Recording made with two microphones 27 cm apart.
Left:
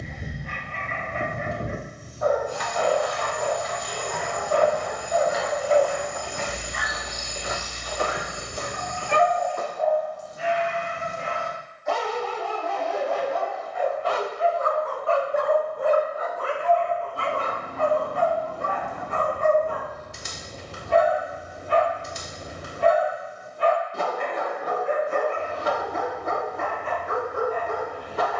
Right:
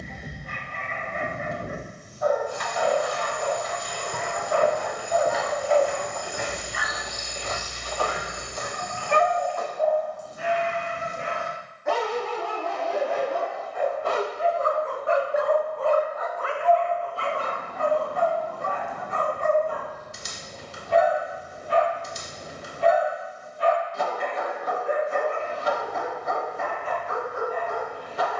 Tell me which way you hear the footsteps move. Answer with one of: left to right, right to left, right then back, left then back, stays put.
right to left.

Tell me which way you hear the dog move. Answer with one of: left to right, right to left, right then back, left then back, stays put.
right then back.